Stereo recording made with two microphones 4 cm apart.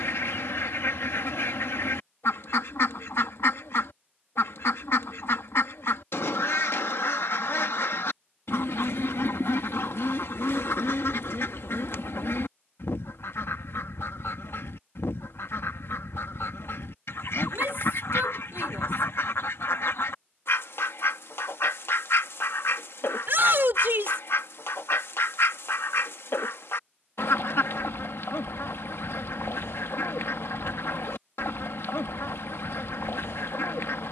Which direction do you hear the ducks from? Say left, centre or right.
left.